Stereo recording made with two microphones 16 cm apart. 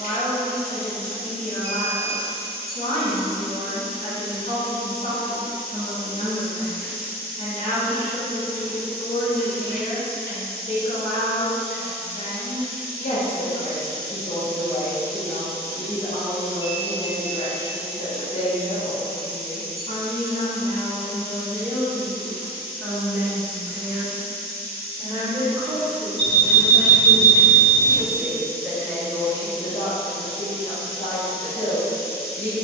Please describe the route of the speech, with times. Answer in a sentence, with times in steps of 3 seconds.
In this clip you hear the speech on the left from 0 s, in the centre from 21 s, on the right from 24 s, in the centre from 27 s and on the left from 30 s.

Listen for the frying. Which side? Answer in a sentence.
You can hear the frying on the left.